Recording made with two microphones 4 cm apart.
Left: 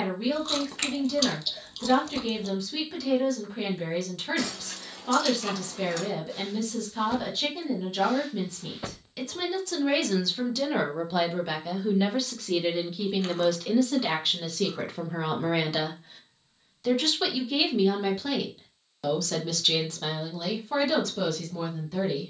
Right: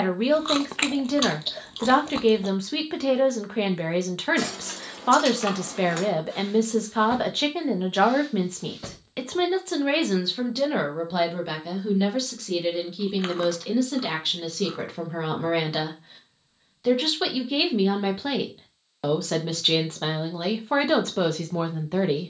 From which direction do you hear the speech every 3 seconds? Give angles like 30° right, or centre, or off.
50° right, 50° right, 50° right, 20° right, centre, 10° right, 30° right, 40° right.